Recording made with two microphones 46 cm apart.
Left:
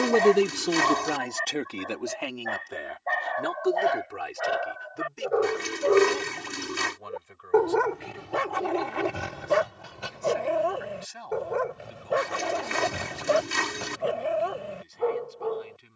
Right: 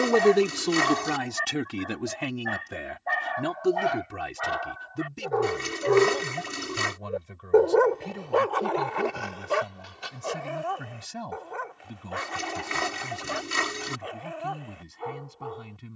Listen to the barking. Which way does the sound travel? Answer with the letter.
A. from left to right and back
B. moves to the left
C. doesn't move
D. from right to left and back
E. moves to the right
B.